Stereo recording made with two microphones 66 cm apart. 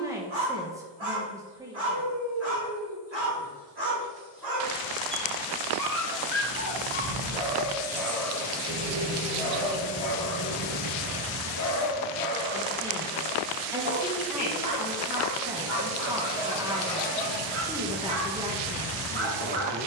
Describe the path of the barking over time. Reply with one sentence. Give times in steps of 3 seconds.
You can hear the barking on the right from 0 s, in the centre from 6 s, on the left from 9 s, in the centre from 12 s and on the right from 15 s.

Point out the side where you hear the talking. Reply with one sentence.
In this clip you hear the talking in the centre.